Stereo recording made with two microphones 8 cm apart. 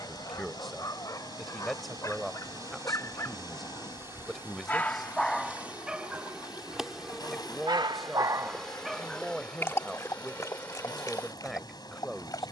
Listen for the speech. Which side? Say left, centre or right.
centre.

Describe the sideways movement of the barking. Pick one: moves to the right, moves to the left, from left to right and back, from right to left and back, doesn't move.
from left to right and back.